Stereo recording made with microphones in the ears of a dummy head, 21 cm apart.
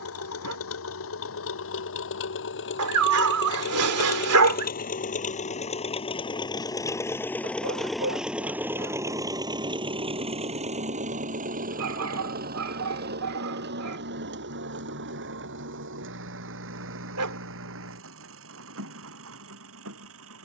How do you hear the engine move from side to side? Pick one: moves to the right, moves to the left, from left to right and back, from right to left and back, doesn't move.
moves to the right.